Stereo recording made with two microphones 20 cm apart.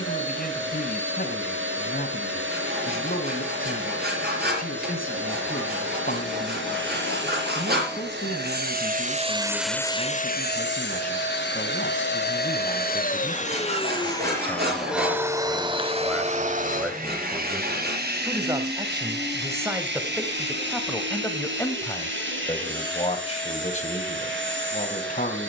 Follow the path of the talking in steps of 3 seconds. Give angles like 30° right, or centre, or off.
50° left, 50° left, 50° left, 50° left, 30° left, centre, 10° right, 20° left, 40° left.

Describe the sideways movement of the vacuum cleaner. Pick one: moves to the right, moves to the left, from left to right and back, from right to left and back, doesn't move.
from right to left and back.